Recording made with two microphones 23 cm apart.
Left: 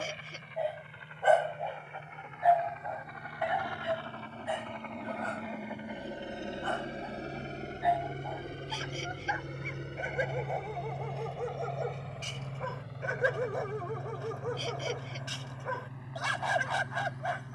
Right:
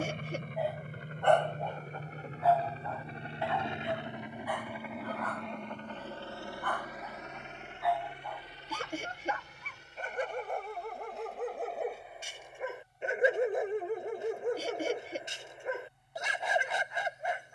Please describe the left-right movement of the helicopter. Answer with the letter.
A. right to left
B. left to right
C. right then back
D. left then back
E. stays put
A.